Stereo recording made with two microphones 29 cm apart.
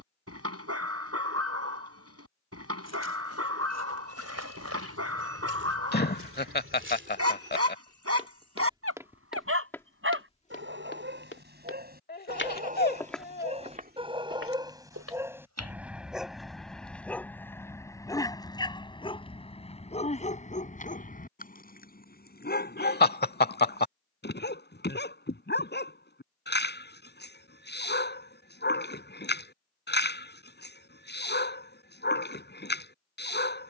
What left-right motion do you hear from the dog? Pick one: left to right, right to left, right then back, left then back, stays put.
right to left.